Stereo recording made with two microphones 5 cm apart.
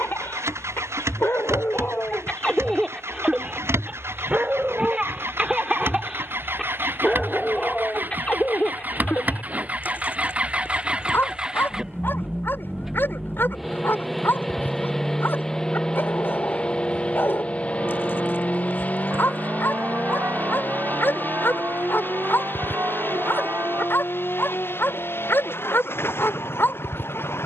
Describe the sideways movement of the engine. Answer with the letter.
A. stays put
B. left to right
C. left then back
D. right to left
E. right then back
D.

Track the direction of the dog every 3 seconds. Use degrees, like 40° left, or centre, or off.
30° left, 20° right, 20° left, 40° left, 50° left, 50° left, 50° left, 50° left, 50° left.